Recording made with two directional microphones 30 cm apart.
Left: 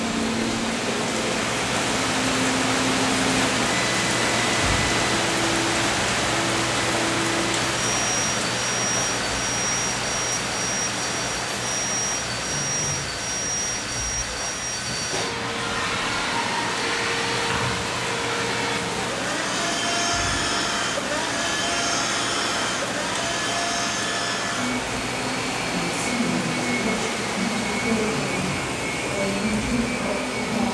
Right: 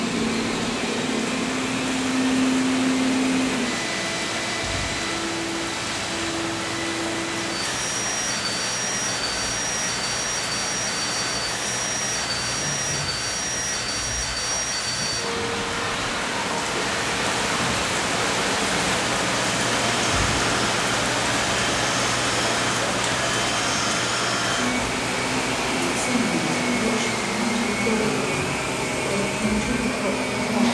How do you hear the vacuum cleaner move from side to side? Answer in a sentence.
In this clip you hear the vacuum cleaner move from right to left and back again.